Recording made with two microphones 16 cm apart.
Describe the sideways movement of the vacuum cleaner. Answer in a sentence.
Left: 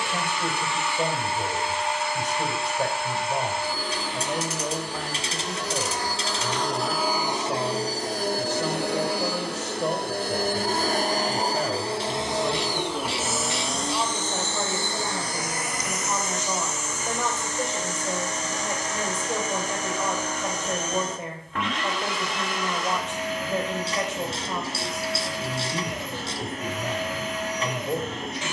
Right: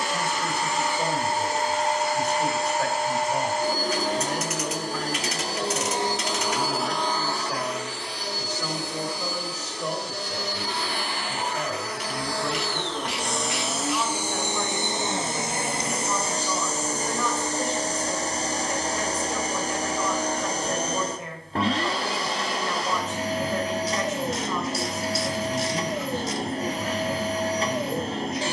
In this clip you hear the vacuum cleaner move from right to left and back again.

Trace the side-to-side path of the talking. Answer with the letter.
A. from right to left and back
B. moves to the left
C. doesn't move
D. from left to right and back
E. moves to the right
C.